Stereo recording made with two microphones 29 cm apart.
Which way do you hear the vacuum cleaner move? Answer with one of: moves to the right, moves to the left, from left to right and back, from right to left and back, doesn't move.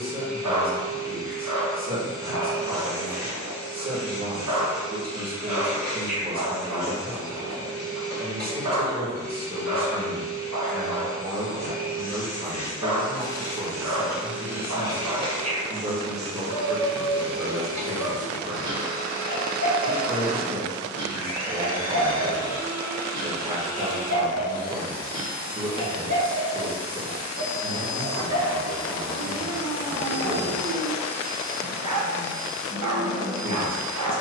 moves to the right.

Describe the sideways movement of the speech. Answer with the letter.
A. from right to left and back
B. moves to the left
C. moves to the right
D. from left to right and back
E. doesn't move
E.